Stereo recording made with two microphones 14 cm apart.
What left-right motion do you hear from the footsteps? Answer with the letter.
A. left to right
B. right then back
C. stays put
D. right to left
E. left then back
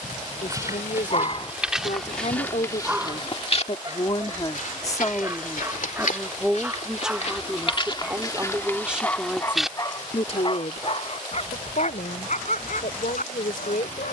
E.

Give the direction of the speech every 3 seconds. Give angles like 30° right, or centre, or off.
60° left, 30° left, 10° right, 50° left, 80° left.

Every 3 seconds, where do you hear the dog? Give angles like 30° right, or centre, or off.
30° left, 20° right, centre, 40° left, 70° left.